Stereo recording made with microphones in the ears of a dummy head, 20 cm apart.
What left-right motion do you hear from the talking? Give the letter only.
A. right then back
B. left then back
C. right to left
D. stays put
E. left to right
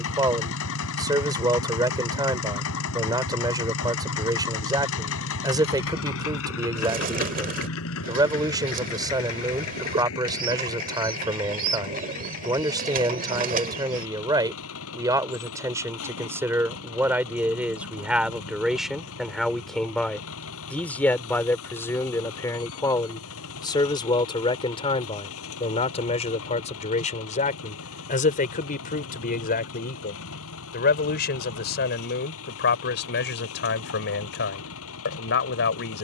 C.